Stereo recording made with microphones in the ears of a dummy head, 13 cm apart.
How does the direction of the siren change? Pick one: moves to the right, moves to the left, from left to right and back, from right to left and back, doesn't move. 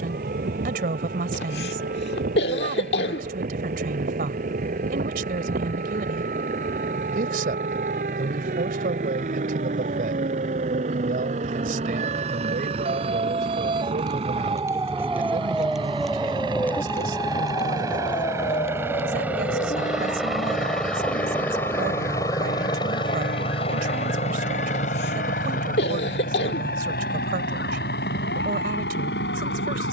moves to the left.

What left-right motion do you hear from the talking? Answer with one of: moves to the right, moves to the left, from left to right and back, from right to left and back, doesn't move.
doesn't move.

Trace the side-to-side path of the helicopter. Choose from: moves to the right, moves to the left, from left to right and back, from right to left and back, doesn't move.
moves to the left.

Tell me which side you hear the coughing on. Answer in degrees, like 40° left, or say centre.
80° left.